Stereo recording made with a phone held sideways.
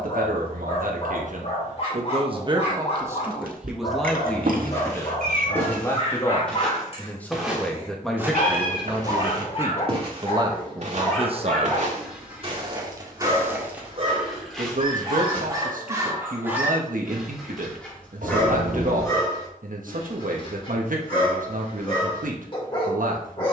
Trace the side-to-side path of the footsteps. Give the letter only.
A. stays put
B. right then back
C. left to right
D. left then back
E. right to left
B.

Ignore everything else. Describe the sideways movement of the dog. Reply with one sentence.
You can hear the dog go right and come back.